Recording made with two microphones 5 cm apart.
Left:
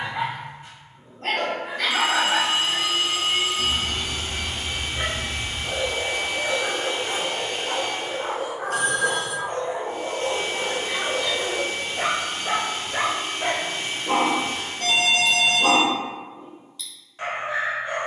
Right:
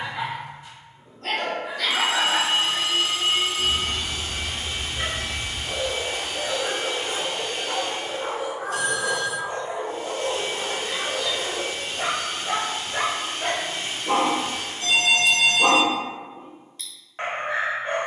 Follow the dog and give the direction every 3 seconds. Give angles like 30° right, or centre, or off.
40° left, 40° left, 40° left, 40° left, 10° left, 40° right.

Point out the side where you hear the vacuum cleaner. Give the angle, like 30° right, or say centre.
40° left.